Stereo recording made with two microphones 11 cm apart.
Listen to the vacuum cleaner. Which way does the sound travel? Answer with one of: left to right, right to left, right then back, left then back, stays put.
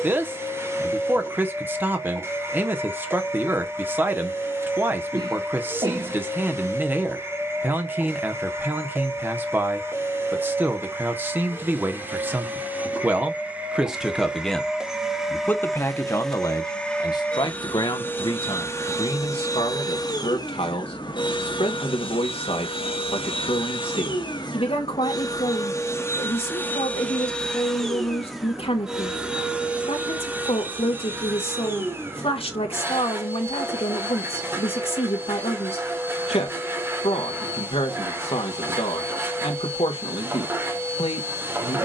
left then back.